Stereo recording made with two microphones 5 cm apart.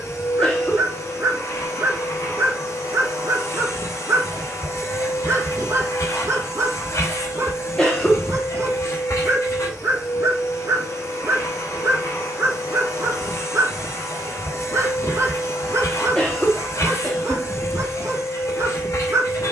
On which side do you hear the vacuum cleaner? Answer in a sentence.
You can hear the vacuum cleaner on the left.